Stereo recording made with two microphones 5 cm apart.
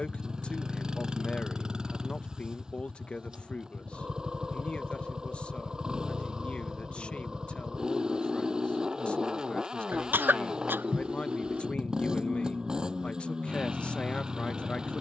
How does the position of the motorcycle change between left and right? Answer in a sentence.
You can hear the motorcycle stay put.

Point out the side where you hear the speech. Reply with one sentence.
In this clip you hear the speech on the left.